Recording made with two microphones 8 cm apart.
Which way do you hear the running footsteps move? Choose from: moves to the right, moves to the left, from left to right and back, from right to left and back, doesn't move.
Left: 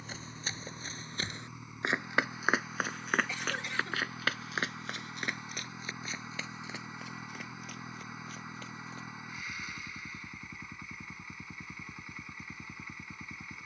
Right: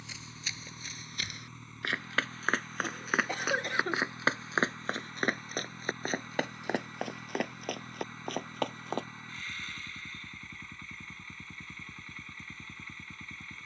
moves to the right.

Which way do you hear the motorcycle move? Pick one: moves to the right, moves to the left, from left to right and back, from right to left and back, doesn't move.
doesn't move.